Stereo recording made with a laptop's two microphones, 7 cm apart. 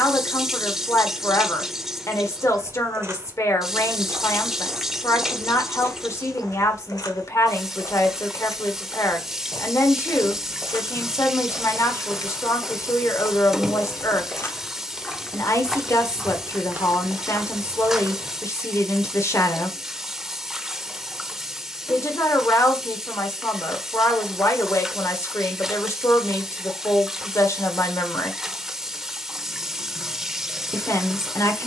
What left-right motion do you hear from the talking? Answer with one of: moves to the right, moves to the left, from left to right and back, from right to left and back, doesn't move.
doesn't move.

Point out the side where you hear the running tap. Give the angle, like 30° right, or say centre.
10° right.